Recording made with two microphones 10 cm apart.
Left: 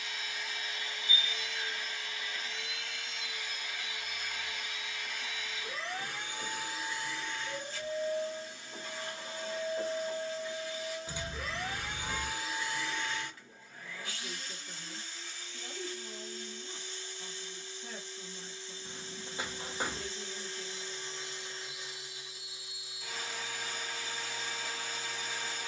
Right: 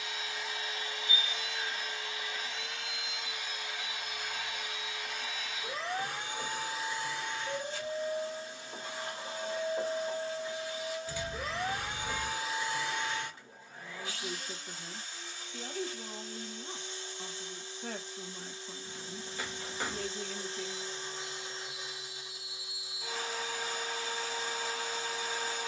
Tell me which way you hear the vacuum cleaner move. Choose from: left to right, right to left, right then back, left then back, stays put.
stays put.